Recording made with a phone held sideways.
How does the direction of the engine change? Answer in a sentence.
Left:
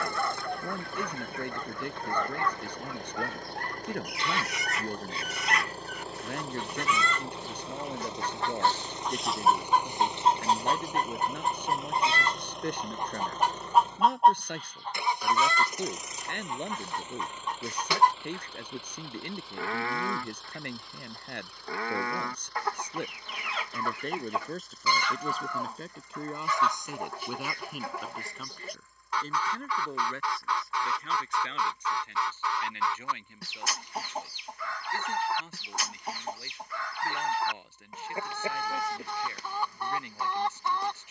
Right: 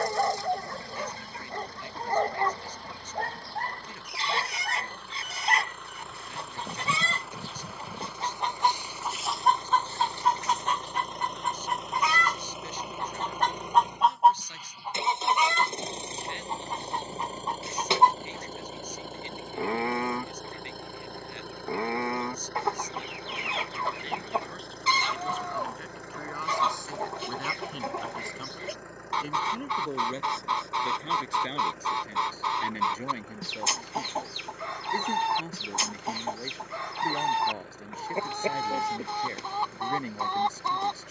In this clip you hear the engine go from the left side to the right.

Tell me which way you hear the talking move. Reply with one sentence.
In this clip you hear the talking go from the left side to the right.